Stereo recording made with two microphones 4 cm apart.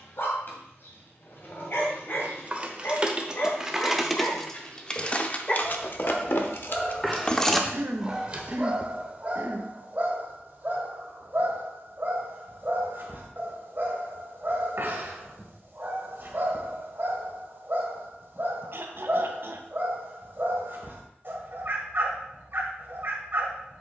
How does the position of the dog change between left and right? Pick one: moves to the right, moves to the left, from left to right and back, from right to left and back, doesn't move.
moves to the right.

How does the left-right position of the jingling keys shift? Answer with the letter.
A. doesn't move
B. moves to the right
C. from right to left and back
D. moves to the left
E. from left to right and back
C.